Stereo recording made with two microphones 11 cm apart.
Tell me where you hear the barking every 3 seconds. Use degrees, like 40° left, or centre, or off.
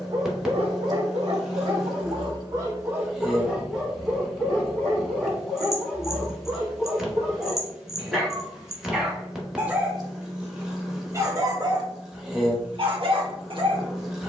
50° right, 10° left, centre, 20° right, 50° right.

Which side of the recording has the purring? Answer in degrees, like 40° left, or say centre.
10° right.